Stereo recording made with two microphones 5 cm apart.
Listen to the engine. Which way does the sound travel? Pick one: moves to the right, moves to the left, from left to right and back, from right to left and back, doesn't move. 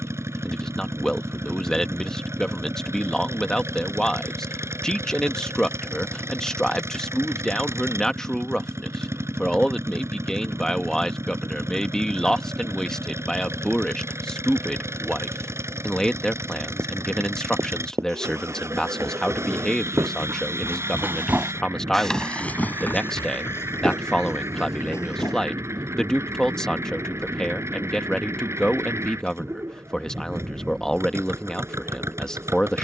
doesn't move.